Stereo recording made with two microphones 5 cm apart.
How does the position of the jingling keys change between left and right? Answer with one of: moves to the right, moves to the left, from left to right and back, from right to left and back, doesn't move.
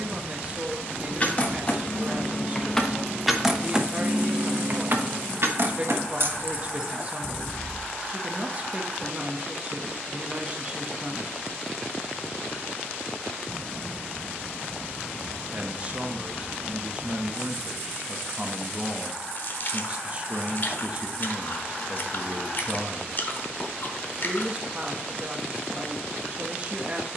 from left to right and back.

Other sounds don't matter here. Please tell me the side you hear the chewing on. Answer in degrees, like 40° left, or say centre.
50° left.